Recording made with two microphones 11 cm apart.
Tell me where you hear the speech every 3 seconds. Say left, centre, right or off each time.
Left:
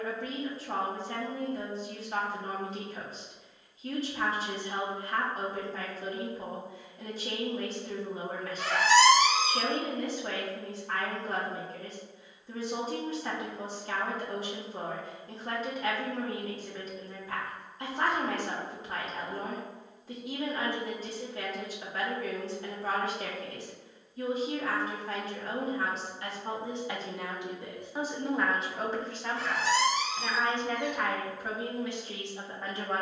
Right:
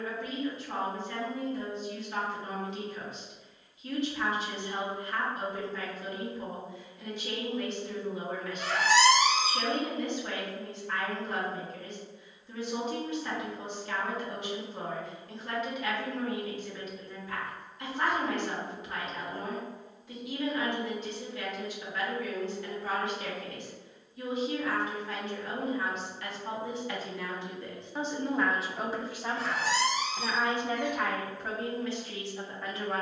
left, left, left, left, left, left, left, left, left, centre, centre.